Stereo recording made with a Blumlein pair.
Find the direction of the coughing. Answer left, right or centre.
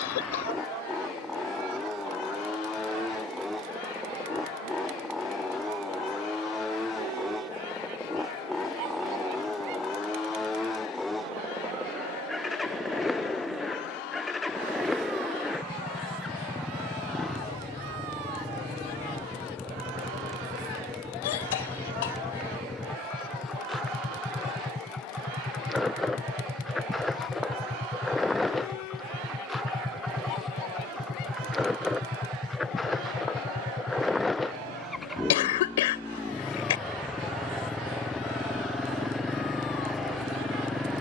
left.